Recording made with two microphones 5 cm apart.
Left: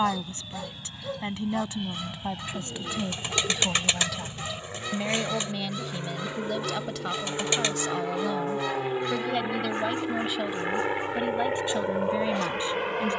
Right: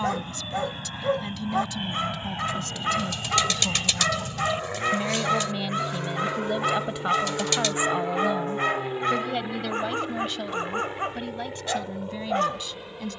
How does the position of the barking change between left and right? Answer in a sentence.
In this clip you hear the barking stay in one place.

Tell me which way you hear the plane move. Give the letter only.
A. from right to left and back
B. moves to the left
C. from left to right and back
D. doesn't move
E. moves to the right
B.